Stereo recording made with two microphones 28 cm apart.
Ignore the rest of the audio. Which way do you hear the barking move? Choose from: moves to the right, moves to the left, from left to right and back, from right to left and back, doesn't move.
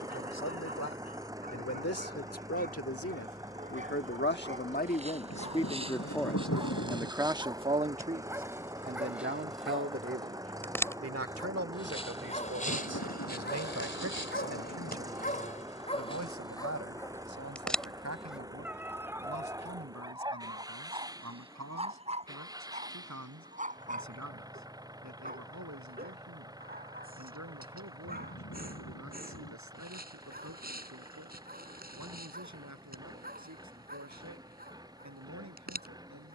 from right to left and back.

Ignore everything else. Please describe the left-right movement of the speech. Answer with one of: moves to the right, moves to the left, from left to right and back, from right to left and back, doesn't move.
moves to the right.